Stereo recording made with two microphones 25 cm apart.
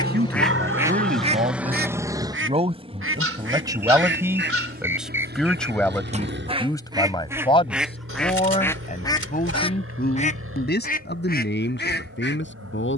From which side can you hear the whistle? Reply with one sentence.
You can hear the whistle in the centre.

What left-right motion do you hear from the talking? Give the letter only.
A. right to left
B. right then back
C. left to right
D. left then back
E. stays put
A.